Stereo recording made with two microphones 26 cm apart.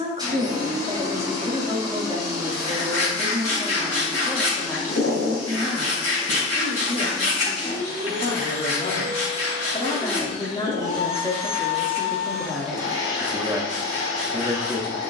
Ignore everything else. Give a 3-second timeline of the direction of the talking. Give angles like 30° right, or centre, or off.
20° right, centre, 40° left, 20° left, 10° right.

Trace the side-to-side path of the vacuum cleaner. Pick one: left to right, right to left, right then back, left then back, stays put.
stays put.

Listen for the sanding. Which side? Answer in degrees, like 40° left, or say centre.
70° left.